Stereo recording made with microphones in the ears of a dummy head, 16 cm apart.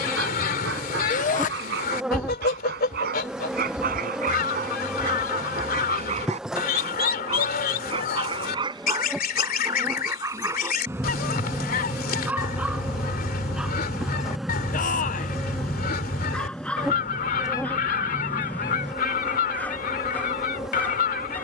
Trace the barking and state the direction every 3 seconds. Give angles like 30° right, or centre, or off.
60° right, 50° right, 30° right, 20° right, centre, 10° left, 10° left.